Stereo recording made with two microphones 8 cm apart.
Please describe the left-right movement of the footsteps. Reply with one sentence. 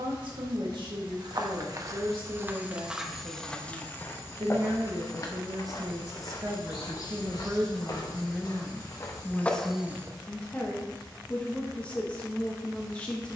You can hear the footsteps go left and come back.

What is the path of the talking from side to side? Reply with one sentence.
In this clip you hear the talking go from the right side to the left.